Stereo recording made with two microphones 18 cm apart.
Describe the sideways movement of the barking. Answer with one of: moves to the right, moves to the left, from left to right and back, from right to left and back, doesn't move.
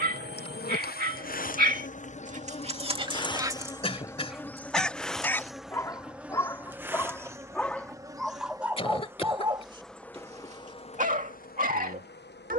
from right to left and back.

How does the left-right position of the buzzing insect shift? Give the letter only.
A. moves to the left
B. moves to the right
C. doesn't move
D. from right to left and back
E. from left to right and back
E.